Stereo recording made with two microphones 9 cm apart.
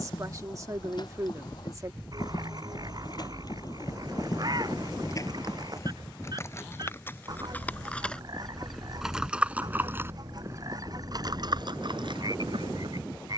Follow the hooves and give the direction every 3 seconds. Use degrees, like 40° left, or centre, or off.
50° left, 40° left, 20° left, 30° right, 60° right.